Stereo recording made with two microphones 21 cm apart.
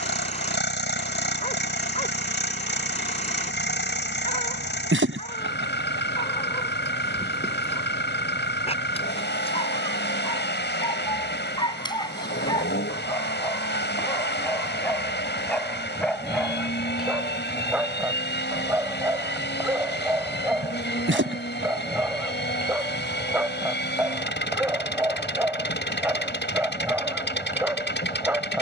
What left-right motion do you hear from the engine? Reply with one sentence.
You can hear the engine stay in one place.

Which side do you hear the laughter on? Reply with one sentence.
In this clip you hear the laughter on the right.